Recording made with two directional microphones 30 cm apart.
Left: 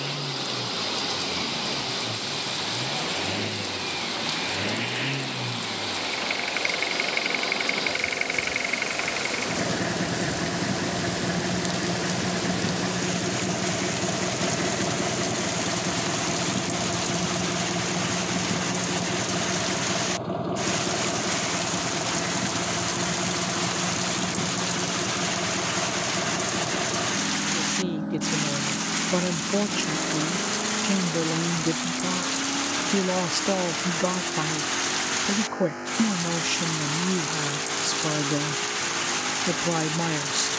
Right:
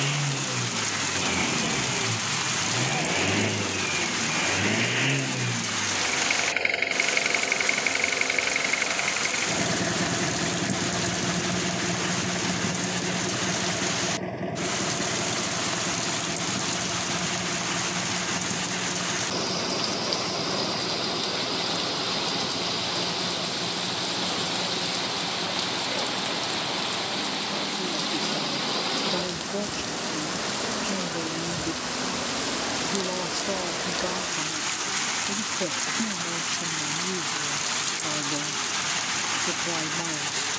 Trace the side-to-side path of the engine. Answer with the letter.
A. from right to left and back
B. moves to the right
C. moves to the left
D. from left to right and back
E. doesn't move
C.